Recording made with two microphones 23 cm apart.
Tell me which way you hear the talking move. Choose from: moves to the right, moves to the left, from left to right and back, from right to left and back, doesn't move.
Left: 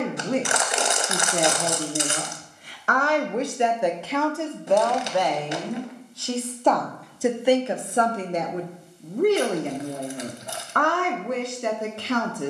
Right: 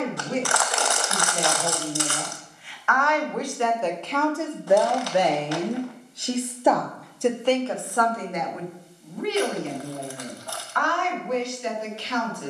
from left to right and back.